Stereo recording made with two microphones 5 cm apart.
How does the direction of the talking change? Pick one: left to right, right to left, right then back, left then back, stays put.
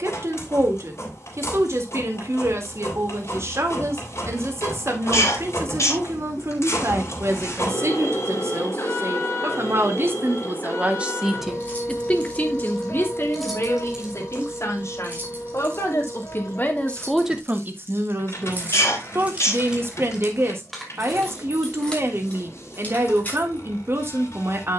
left then back.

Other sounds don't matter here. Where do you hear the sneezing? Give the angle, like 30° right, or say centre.
60° left.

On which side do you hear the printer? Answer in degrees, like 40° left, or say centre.
60° left.